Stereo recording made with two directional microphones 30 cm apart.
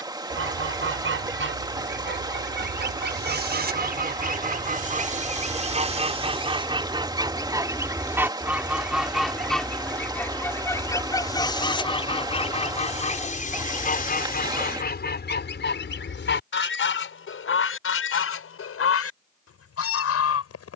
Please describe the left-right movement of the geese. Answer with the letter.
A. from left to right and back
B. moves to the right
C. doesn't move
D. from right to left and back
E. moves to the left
E.